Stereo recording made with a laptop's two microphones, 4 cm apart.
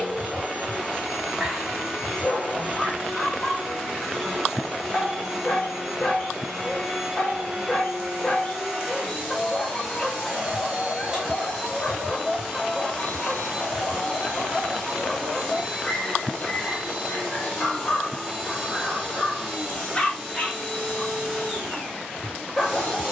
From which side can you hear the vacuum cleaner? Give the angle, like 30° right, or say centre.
10° right.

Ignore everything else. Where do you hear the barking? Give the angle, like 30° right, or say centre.
20° left.